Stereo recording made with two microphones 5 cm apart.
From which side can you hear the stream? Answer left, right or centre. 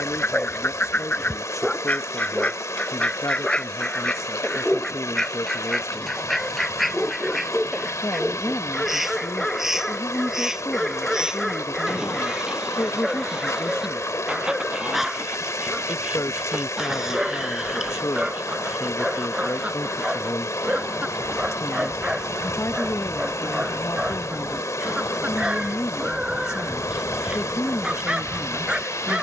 left.